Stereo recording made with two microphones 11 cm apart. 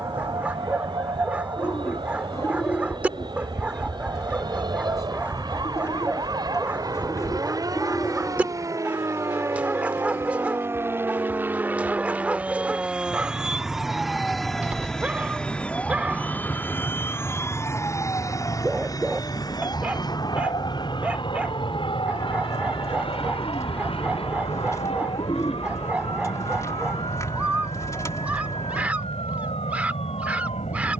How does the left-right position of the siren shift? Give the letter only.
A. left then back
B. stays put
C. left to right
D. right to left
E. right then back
D.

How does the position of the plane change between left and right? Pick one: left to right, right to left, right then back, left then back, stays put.
right to left.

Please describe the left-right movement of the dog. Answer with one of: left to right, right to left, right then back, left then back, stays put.
stays put.